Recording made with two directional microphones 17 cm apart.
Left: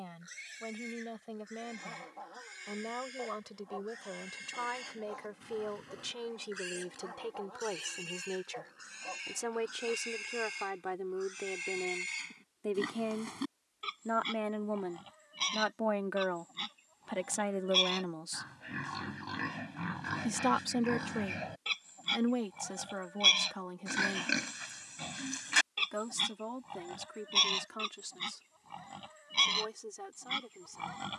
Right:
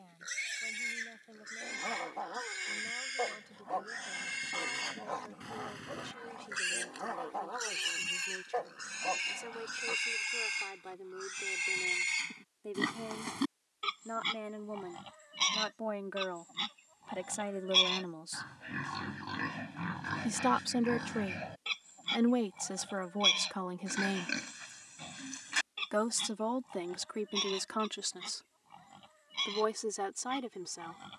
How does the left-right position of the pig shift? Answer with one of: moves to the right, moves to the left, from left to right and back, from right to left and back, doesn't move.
moves to the left.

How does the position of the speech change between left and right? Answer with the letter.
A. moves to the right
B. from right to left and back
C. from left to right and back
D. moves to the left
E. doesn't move
A.